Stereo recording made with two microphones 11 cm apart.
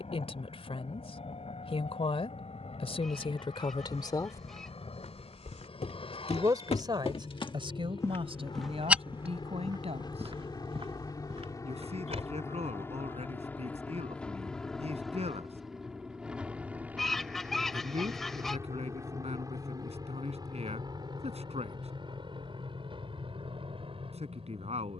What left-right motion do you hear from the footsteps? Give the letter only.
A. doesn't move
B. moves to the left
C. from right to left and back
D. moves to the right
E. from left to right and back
D.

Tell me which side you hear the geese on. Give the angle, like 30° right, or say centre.
centre.